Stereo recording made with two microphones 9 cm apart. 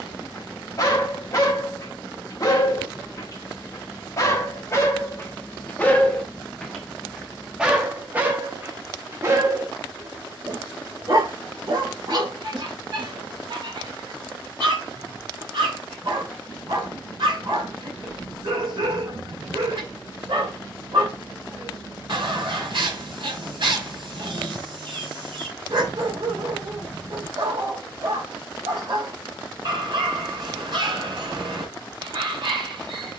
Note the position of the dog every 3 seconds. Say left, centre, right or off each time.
left, left, centre, right, right, right, right, right, right, right, right.